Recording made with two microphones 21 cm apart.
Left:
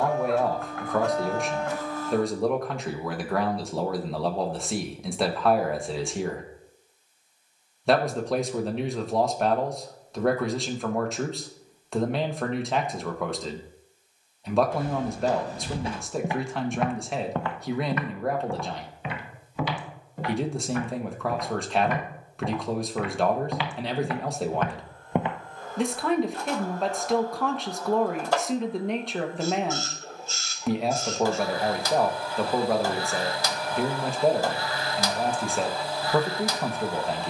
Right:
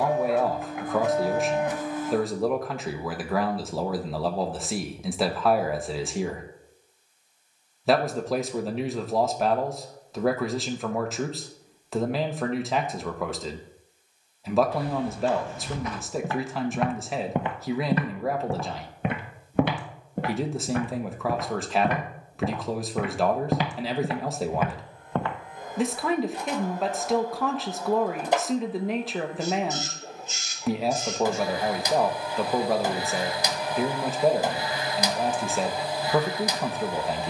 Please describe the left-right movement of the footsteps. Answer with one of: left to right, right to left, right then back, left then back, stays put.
right then back.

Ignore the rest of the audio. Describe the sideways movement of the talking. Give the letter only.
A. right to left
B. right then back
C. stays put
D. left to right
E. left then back
C.